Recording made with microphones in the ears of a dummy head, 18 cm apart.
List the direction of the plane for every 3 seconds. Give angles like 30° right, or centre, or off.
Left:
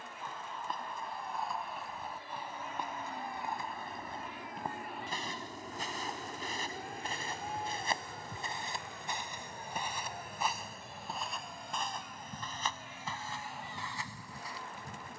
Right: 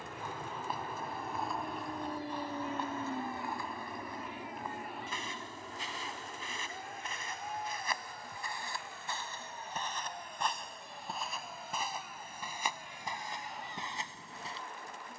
40° right, 10° right, 20° left, 40° left, 50° left.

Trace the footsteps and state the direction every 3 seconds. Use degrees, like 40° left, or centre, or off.
centre, 30° left, 30° left, centre, 20° right.